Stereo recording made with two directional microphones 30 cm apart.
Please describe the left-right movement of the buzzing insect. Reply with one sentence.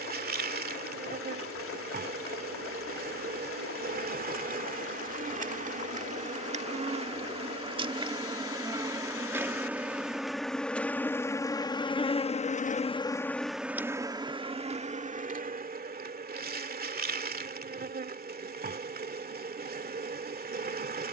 You can hear the buzzing insect move from right to left and back again.